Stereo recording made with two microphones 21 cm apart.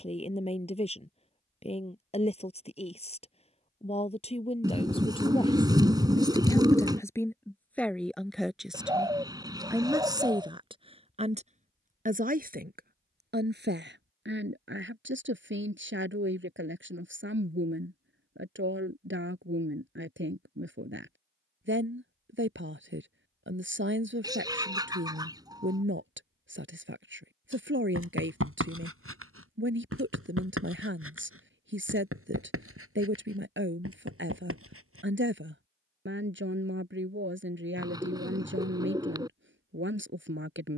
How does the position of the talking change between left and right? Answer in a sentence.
You can hear the talking travel towards the right.